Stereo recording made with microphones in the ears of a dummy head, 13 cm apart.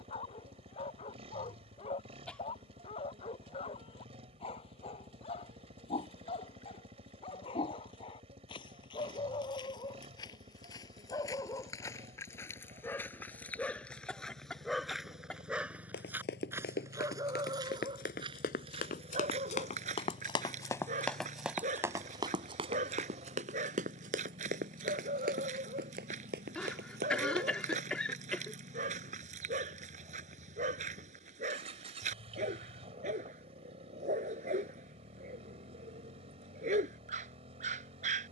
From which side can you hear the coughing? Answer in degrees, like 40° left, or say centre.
10° left.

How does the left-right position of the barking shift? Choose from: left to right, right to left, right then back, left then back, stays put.
left to right.